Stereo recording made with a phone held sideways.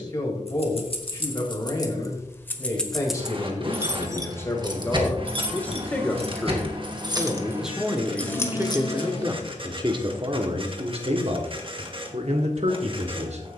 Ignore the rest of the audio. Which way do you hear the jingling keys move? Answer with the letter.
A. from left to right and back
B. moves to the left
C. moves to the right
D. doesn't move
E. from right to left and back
A.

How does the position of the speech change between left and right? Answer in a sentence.
In this clip you hear the speech move from left to right.